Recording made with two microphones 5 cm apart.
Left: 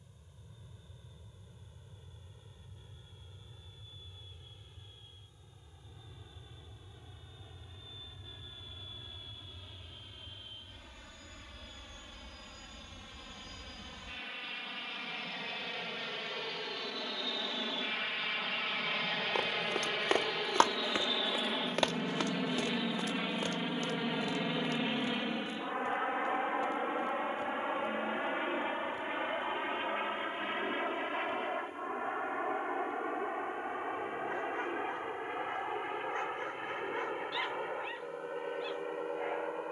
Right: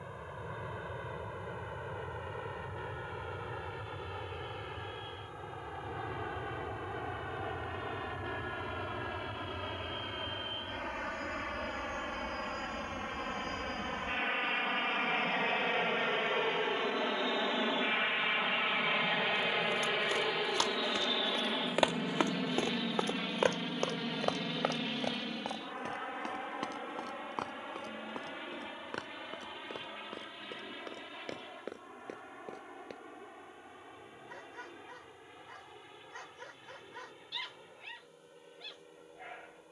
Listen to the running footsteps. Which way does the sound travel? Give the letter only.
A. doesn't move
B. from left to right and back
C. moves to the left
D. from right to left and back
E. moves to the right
E.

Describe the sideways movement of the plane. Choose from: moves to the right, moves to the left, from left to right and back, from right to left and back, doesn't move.
moves to the left.